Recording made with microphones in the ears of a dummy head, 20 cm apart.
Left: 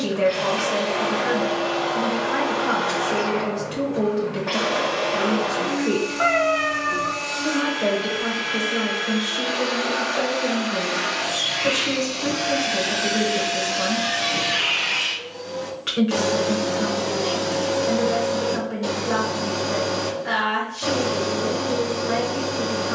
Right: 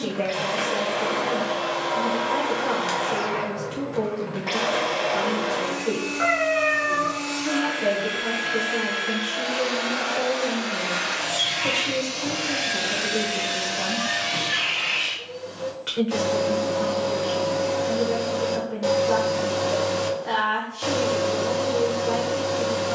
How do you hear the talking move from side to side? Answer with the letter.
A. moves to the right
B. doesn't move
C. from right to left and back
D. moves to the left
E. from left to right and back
B.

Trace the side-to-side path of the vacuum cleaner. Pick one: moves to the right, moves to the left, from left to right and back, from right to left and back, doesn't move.
from right to left and back.